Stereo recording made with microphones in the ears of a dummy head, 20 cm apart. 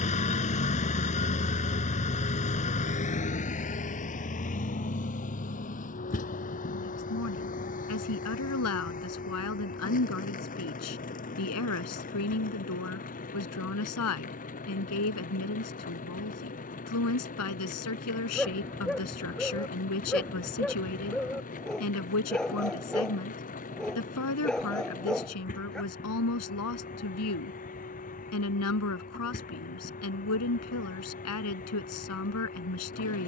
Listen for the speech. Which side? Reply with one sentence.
In this clip you hear the speech on the left.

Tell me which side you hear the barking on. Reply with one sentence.
You can hear the barking in the centre.